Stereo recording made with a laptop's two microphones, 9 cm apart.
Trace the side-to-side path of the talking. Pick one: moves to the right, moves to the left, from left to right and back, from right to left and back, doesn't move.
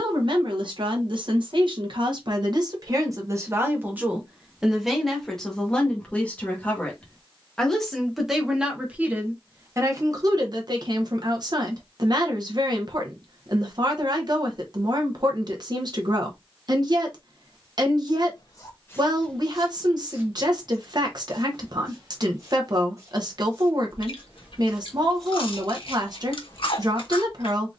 from right to left and back.